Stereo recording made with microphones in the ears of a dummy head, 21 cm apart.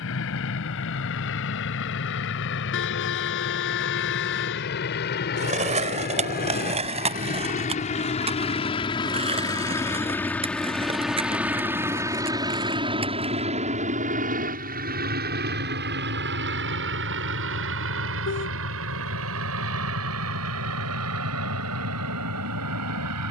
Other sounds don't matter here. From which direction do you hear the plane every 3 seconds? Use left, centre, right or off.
left, left, left, centre, right, right, right, right.